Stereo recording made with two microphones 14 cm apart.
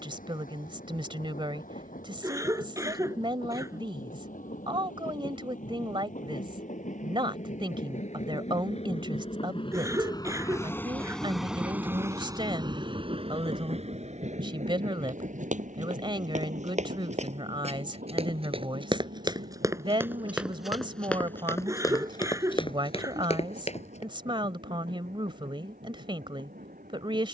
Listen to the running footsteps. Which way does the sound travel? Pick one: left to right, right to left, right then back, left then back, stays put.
right to left.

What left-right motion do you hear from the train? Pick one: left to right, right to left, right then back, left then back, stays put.
left to right.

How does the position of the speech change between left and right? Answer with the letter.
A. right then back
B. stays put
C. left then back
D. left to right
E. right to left
B.